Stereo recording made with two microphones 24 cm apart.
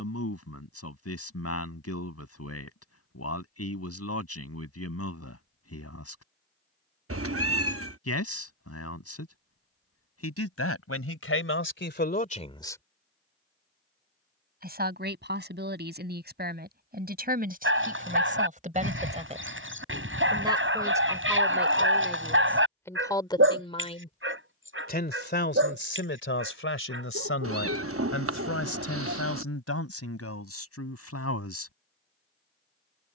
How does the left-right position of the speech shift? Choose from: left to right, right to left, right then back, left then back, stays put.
right then back.